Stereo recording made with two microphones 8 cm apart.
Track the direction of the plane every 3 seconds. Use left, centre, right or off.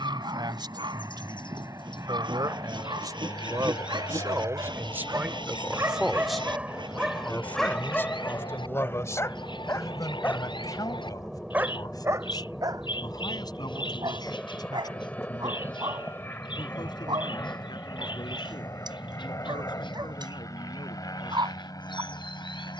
right, right, right, centre, centre, left, left, left.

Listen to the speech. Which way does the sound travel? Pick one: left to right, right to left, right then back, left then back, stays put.
right to left.